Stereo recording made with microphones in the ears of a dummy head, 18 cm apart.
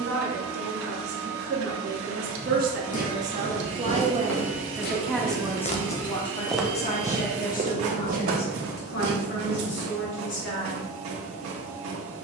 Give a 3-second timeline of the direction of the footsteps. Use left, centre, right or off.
left, left, right, right.